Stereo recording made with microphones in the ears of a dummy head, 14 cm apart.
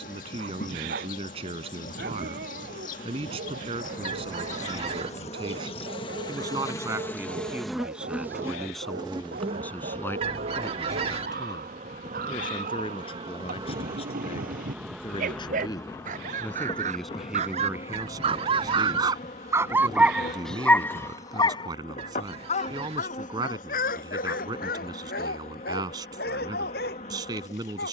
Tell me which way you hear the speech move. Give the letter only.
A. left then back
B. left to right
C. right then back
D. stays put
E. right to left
A.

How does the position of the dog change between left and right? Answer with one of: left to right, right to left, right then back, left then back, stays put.
right to left.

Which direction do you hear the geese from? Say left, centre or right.
right.